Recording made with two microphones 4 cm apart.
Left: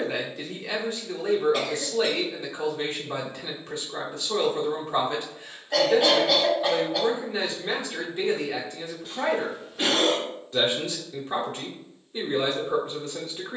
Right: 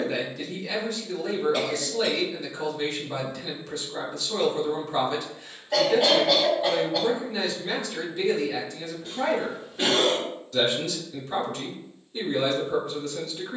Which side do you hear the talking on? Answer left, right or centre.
left.